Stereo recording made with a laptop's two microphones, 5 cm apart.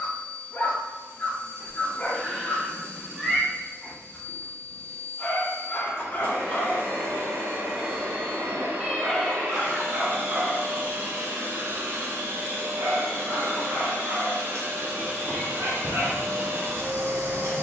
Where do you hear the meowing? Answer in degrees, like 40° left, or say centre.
centre.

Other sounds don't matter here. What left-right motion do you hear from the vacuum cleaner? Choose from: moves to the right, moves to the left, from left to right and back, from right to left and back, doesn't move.
doesn't move.